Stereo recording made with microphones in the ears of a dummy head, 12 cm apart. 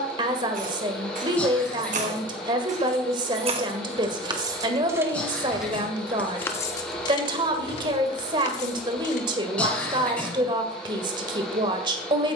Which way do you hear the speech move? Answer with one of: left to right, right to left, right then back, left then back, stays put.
stays put.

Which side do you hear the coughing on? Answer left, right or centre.
centre.